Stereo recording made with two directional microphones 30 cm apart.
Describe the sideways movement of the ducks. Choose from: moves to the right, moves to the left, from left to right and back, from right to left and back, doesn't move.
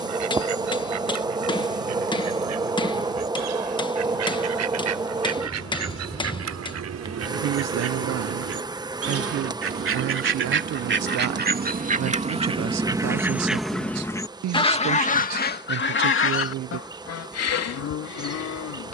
moves to the left.